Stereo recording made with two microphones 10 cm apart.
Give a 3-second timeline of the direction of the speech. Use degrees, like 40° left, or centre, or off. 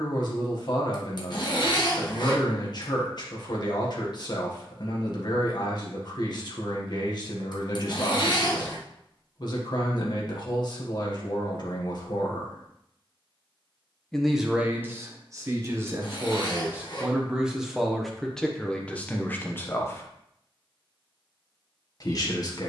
50° left, 50° left, 50° left, 50° left, 10° left, 20° right, 10° left, 40° left.